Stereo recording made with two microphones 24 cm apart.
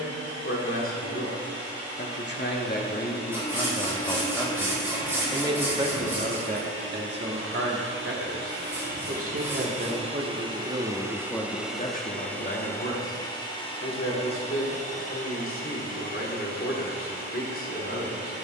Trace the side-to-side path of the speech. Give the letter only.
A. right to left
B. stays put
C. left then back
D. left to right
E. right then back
E.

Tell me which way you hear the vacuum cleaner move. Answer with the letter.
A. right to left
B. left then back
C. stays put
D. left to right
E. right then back
A.